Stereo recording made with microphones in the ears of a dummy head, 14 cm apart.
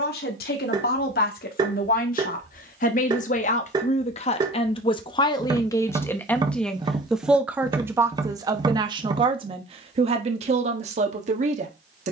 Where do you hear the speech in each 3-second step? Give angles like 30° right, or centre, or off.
60° left, 40° left, 10° right, 40° right.